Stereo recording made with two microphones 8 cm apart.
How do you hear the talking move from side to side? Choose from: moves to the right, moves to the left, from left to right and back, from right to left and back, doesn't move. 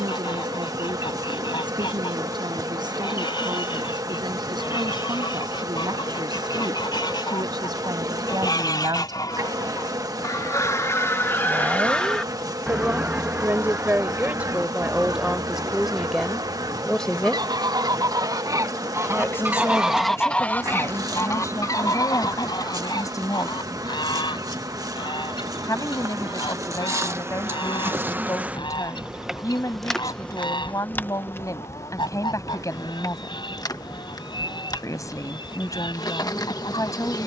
moves to the left.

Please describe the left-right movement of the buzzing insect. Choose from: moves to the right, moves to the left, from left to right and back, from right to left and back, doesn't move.
moves to the left.